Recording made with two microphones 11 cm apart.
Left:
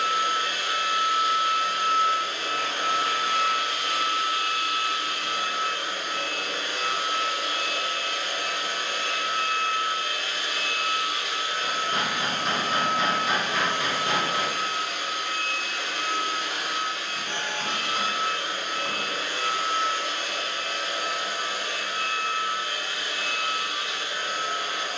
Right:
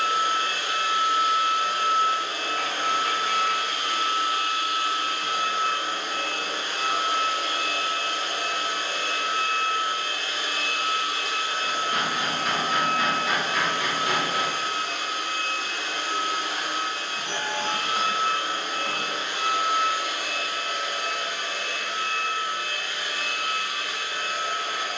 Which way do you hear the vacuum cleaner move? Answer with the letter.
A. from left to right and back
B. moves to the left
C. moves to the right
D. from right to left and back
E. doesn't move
B.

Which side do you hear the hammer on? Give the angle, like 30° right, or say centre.
30° left.